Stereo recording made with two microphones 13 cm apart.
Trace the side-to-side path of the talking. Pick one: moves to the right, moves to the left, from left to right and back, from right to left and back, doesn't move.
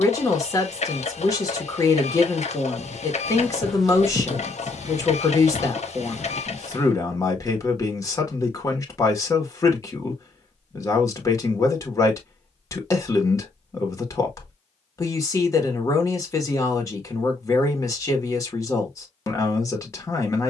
doesn't move.